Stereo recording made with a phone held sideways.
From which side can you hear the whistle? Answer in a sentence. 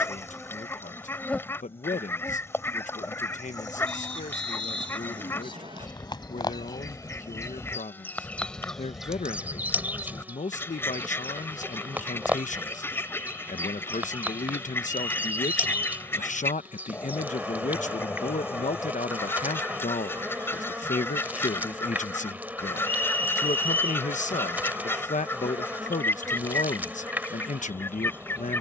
You can hear the whistle on the right.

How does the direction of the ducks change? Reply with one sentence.
You can hear the ducks stay put.